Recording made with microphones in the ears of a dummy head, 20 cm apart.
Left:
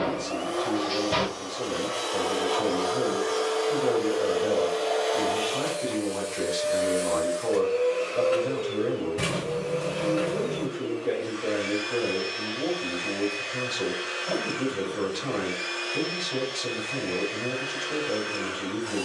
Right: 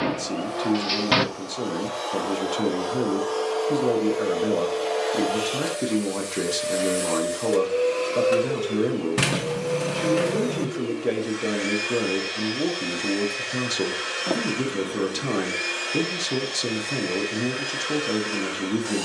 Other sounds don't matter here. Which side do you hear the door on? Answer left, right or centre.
right.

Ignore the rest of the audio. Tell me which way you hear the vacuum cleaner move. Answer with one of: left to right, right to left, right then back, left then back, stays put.
left to right.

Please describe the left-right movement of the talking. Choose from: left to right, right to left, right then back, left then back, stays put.
stays put.